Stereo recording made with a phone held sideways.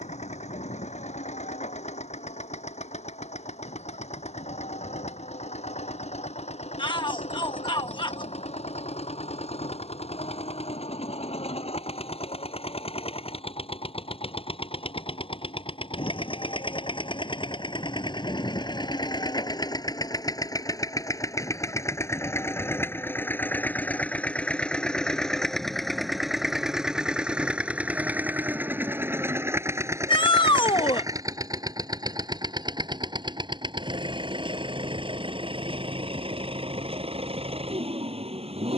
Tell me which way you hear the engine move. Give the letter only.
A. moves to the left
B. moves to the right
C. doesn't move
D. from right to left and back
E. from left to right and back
B.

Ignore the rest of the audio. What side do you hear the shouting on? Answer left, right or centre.
left.